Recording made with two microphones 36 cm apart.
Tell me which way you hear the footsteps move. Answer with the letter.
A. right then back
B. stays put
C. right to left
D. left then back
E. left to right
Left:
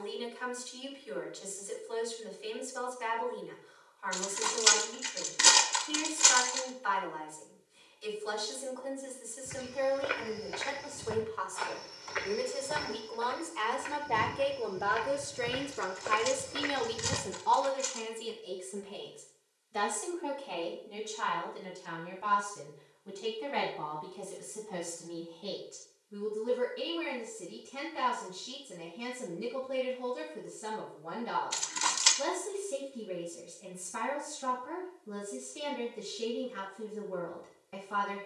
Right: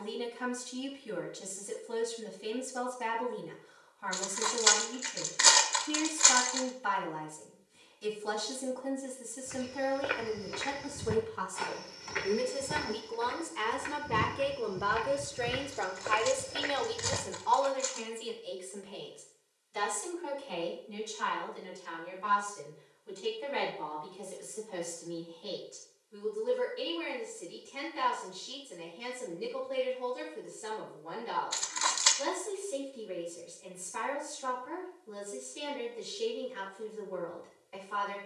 A.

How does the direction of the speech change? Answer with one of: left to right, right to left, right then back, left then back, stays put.
right to left.